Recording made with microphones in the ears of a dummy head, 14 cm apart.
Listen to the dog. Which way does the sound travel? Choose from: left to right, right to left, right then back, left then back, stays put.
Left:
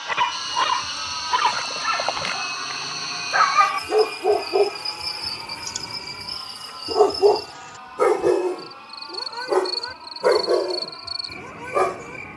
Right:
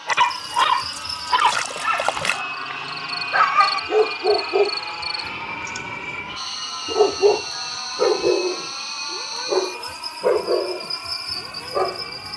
right to left.